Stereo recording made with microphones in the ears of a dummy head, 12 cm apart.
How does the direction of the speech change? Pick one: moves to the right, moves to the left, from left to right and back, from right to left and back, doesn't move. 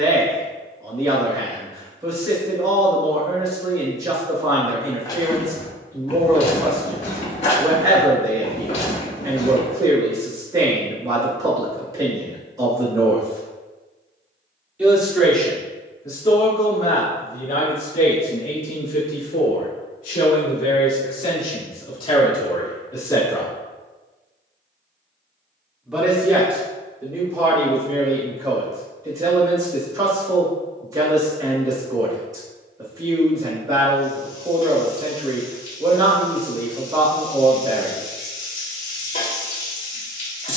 from right to left and back.